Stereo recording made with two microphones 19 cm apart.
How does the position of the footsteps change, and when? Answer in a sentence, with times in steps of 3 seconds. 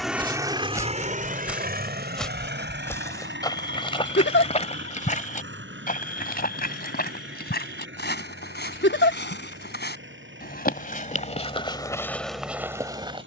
In this clip you hear the footsteps in the centre from 0 s, on the left from 3 s and in the centre from 12 s.